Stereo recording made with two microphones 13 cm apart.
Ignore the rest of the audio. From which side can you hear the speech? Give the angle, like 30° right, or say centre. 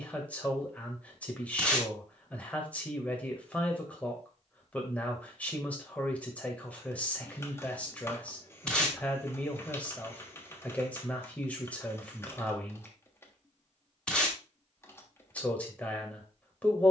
10° left.